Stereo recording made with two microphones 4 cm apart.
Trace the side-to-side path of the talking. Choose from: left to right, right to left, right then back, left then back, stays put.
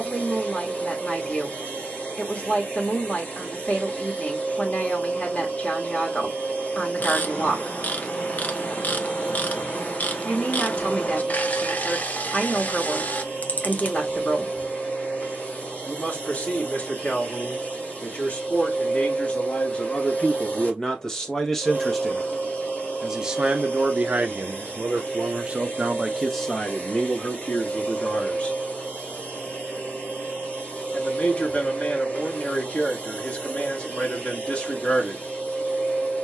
right then back.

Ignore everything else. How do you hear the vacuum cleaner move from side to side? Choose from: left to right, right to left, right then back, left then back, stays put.
stays put.